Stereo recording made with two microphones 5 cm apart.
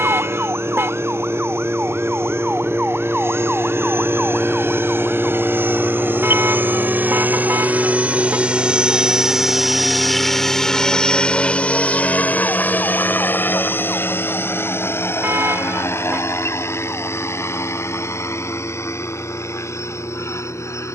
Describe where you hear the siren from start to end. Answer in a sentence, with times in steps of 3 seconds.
You can hear the siren on the right from 0 s, in the centre from 3 s and on the left from 6 s.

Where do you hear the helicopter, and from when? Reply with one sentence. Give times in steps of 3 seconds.
In this clip you hear the helicopter on the right from 0 s, in the centre from 9 s and on the left from 12 s.